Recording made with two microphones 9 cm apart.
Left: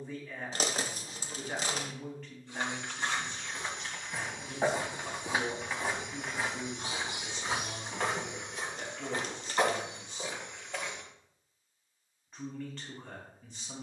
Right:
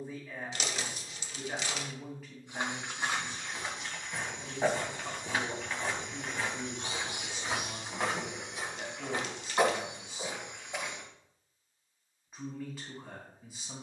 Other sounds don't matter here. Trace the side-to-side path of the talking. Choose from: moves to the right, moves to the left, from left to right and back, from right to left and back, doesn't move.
doesn't move.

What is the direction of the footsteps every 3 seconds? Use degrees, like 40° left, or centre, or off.
20° right, centre, centre, 10° right, off.